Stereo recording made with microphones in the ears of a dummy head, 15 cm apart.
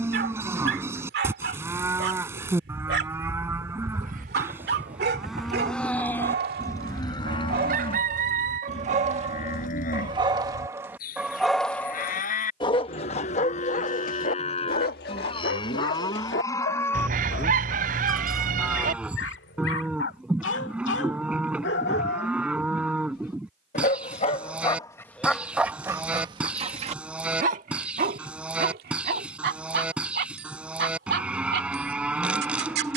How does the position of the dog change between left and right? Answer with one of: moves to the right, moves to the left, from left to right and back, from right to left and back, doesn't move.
from right to left and back.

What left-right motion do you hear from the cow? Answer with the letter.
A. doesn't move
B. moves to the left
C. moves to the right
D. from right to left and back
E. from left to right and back
D.